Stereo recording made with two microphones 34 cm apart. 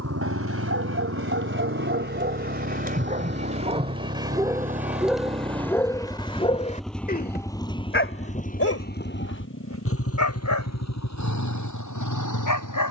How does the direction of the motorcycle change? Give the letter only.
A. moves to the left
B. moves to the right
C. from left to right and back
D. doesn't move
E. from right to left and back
A.